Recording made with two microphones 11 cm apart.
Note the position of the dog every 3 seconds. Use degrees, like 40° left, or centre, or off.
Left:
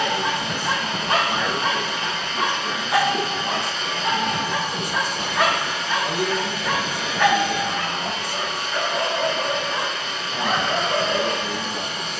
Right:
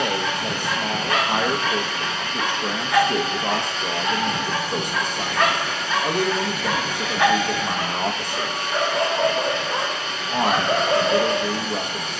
30° left, 10° left, 10° right, 40° right.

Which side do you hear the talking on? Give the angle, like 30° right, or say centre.
60° right.